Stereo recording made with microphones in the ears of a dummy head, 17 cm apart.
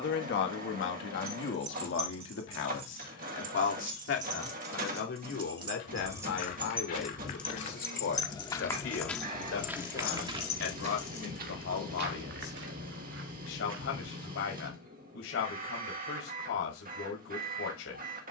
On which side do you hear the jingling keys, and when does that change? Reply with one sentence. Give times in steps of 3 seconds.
In this clip you hear the jingling keys on the right from 0 s, in the centre from 6 s, on the left from 9 s and not at all from 12 s.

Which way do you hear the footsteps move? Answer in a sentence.
In this clip you hear the footsteps go from the left side to the right.